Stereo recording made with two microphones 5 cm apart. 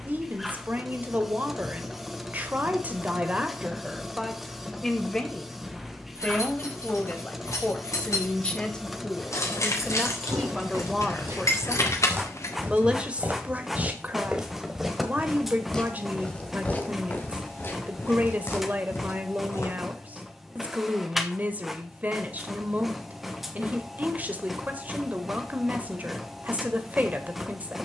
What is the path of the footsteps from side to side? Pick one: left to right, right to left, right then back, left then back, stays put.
right to left.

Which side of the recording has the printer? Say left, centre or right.
centre.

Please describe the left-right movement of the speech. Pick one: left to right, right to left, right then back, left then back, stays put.
left then back.